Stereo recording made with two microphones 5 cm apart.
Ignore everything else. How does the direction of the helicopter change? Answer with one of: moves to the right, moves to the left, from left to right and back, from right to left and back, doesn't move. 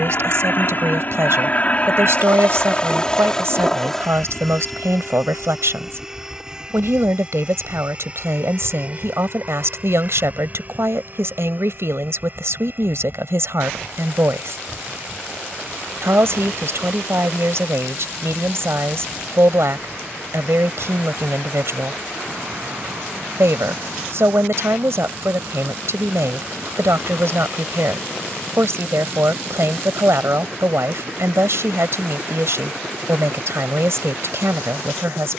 moves to the right.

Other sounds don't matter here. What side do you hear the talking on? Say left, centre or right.
right.